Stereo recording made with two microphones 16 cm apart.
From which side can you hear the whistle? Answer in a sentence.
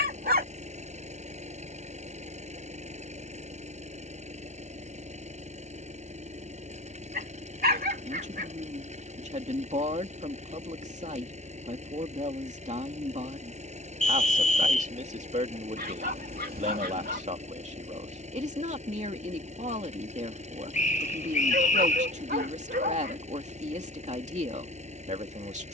In this clip you hear the whistle on the left.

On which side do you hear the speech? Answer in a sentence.
In this clip you hear the speech on the right.